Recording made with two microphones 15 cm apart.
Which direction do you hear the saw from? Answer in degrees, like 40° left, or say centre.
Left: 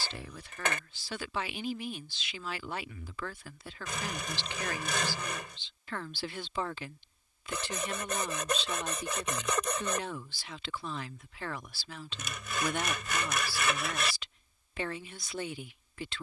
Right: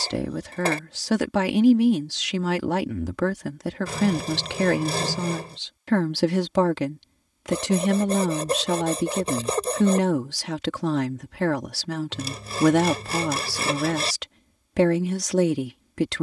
30° right.